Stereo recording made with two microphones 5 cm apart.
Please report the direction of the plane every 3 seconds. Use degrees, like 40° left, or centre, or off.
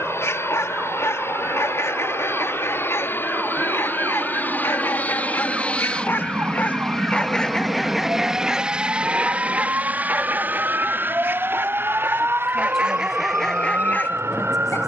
60° left, 40° left, centre, 40° right, 50° right.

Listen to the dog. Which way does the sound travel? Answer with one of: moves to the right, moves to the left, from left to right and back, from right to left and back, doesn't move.
from left to right and back.